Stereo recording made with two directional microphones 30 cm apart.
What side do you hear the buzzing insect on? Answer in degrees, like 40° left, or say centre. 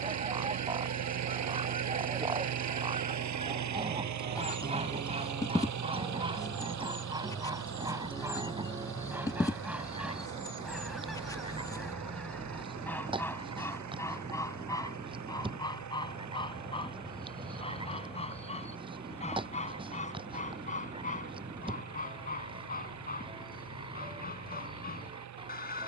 10° left.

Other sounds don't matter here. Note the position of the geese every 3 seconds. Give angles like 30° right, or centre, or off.
20° right, 20° right, 10° right, centre, 10° left, 20° left, 20° left, 30° left, 30° left.